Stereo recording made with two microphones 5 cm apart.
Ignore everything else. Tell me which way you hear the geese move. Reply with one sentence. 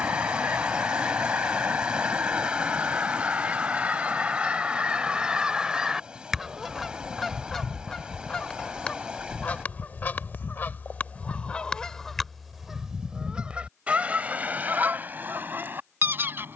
In this clip you hear the geese move from right to left and back again.